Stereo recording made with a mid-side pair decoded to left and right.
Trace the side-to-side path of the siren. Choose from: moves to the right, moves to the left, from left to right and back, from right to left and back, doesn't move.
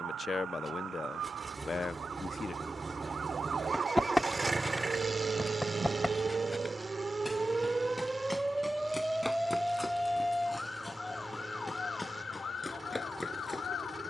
moves to the left.